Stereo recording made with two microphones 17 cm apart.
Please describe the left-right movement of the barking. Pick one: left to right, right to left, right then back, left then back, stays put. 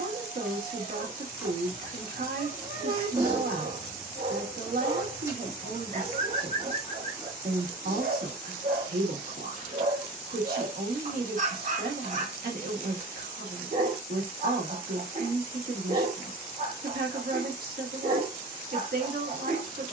stays put.